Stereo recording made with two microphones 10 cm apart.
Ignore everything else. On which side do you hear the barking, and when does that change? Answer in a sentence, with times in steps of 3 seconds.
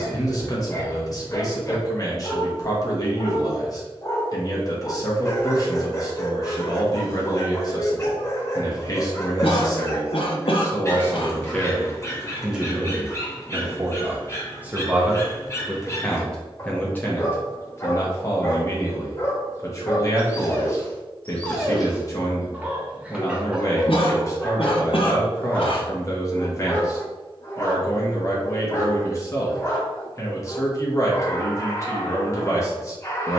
You can hear the barking on the left from 0 s, in the centre from 21 s and on the left from 27 s.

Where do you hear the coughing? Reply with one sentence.
In this clip you hear the coughing on the left.